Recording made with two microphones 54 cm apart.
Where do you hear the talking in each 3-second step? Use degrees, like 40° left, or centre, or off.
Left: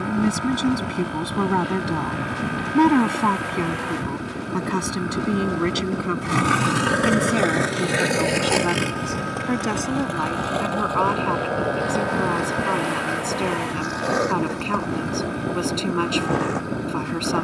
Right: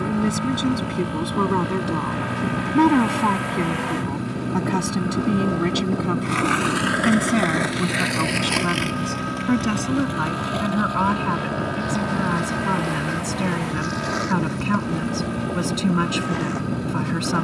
10° left, 10° right, 20° right, 40° right, 40° right, 40° right.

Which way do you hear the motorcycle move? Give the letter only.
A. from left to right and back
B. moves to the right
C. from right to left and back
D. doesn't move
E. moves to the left
D.